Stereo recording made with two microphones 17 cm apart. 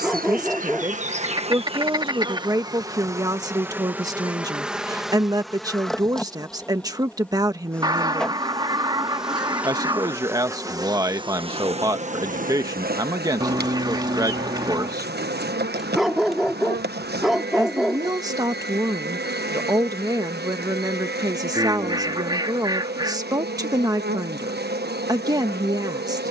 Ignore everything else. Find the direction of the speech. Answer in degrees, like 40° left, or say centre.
20° right.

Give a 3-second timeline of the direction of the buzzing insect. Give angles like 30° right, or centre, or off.
40° right, 10° right, centre, 20° right, 60° right, 60° right, 60° right, 60° right, 60° right.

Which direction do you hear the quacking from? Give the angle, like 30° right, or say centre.
20° right.